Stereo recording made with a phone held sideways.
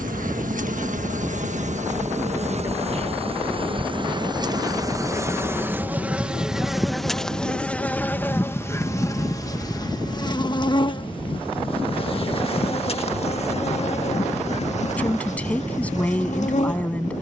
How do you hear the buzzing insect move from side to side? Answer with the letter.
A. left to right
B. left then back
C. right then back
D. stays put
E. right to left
E.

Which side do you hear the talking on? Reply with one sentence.
In this clip you hear the talking in the centre.